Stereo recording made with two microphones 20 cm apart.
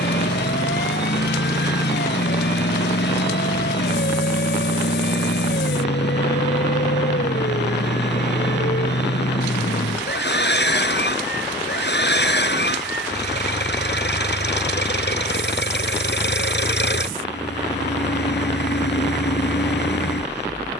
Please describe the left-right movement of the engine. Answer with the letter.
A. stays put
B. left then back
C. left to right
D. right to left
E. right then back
A.